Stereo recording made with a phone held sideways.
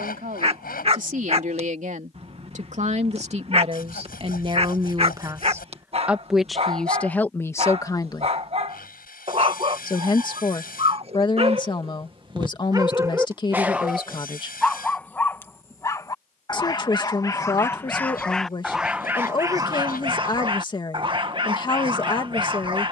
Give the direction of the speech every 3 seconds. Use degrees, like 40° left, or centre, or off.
60° right, 40° right, 10° left, 30° left, 30° left, 30° left, 30° left, 30° left.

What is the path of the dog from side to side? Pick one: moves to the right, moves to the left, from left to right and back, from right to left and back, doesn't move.
from right to left and back.